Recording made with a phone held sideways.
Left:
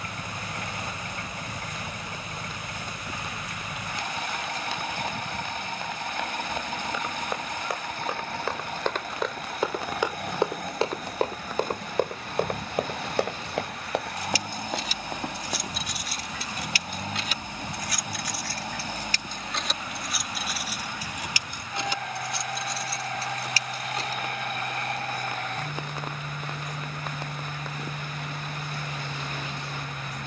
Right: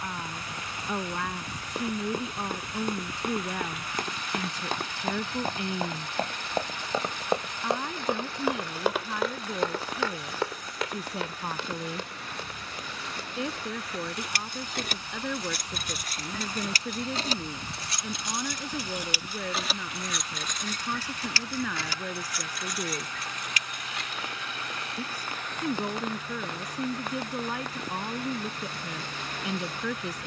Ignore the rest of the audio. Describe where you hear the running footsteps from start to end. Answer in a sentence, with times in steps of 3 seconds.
In this clip you hear the running footsteps on the right from 0 s, on the left from 9 s and not at all from 18 s.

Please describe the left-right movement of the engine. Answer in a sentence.
You can hear the engine stay put.